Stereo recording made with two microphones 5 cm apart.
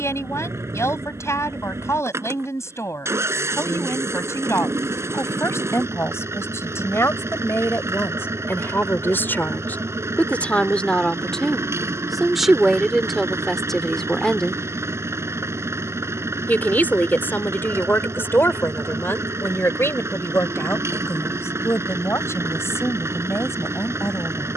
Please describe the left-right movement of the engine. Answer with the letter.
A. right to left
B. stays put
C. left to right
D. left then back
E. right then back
B.